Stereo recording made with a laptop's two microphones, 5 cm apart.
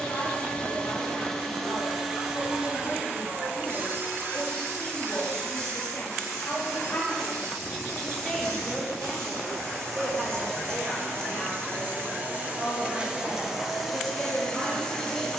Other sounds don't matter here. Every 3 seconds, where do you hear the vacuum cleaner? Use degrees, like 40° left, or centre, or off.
centre, 50° right, 70° right, 60° right, 10° right.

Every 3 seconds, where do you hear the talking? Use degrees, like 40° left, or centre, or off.
70° left, 60° left, 20° left, 40° right, 60° right.